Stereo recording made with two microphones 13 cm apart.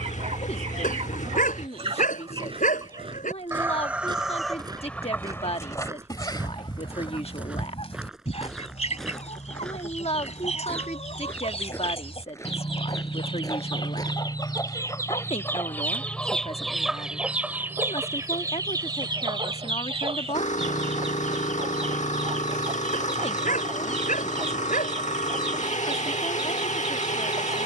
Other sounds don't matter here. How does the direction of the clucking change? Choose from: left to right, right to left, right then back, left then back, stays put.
left then back.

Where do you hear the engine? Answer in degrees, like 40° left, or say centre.
60° left.